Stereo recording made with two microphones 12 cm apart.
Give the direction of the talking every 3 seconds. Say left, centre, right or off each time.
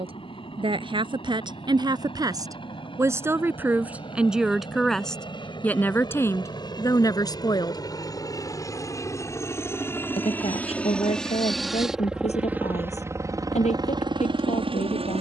right, centre, left, left, left.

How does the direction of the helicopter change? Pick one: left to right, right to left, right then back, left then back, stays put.
left to right.